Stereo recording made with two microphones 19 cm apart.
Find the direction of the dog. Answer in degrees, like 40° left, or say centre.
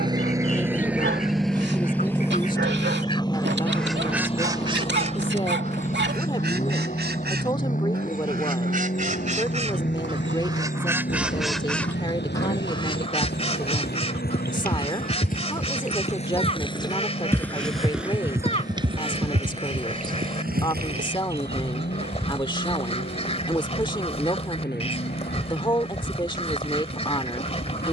70° right.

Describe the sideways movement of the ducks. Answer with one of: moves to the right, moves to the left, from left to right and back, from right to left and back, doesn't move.
from left to right and back.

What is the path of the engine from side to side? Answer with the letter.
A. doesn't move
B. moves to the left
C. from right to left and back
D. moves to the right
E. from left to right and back
B.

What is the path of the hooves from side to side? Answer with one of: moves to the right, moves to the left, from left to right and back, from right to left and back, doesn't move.
moves to the right.